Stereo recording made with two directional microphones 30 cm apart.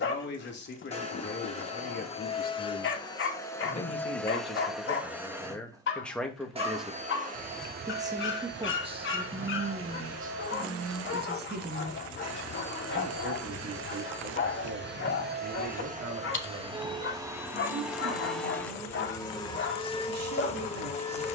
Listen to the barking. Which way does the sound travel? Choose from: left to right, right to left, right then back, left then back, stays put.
stays put.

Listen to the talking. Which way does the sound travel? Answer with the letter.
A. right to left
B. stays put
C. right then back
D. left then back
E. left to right
E.